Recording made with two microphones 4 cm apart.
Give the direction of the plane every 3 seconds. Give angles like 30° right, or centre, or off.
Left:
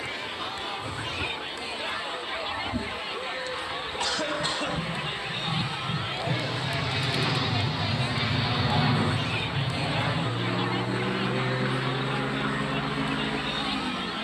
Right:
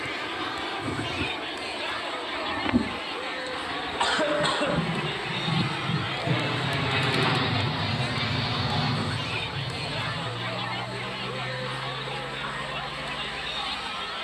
70° right, 50° right, 10° right, 40° left, 60° left.